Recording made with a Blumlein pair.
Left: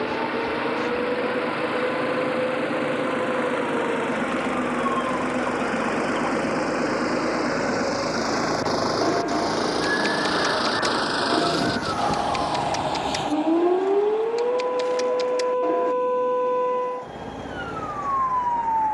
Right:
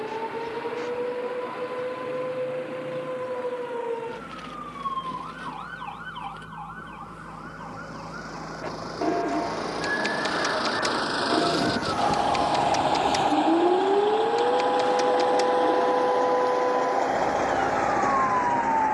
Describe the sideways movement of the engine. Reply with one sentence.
In this clip you hear the engine go from the left side to the right.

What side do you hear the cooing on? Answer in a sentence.
In this clip you hear the cooing in the centre.